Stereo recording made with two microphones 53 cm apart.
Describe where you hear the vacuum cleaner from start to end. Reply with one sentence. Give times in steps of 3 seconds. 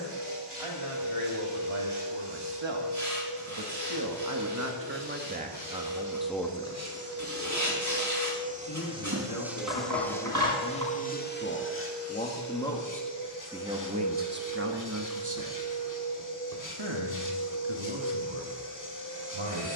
You can hear the vacuum cleaner on the right from 0 s, in the centre from 9 s and on the left from 12 s.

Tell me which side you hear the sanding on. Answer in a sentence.
In this clip you hear the sanding on the right.